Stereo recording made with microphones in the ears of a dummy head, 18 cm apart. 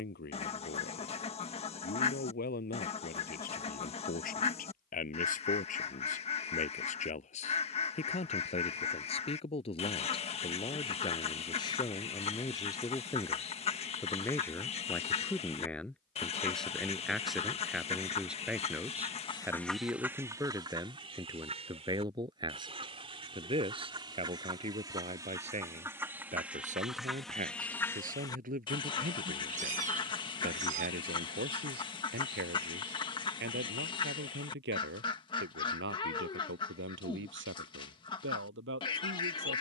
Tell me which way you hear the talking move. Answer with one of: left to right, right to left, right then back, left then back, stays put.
left to right.